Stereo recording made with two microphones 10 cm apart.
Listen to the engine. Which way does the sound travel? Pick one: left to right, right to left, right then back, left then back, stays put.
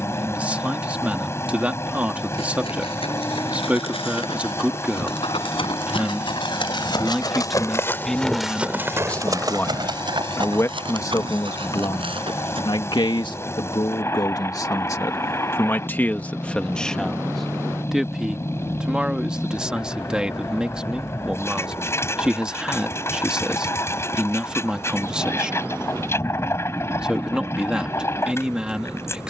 stays put.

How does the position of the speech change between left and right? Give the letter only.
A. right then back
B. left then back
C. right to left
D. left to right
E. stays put
B.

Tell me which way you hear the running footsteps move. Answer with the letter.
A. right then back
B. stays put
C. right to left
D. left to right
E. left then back
D.